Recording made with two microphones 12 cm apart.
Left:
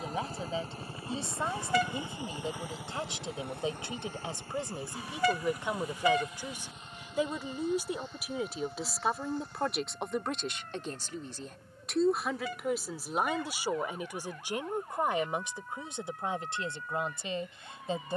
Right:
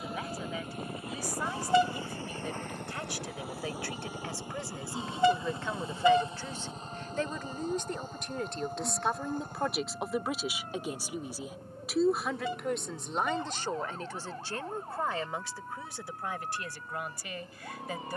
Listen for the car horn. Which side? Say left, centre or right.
right.